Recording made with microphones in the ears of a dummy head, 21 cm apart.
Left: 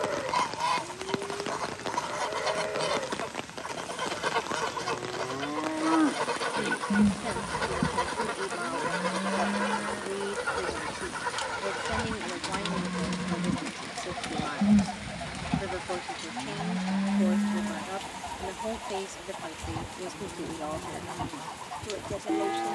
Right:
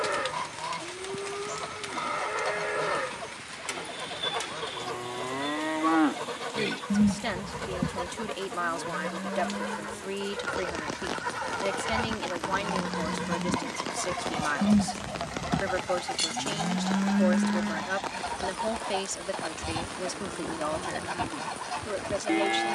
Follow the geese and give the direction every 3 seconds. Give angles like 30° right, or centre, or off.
30° left, 30° left, 30° left, 10° left, 40° right, 60° right, 70° right, 70° right.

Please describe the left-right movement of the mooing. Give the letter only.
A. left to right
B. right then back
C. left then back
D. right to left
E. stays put
C.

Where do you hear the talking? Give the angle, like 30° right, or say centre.
50° right.